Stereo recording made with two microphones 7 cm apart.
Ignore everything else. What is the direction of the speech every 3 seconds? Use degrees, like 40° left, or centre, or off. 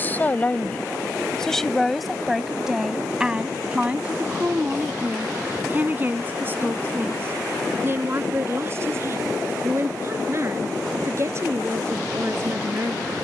10° left, 20° right, 30° right, 40° right, 40° right.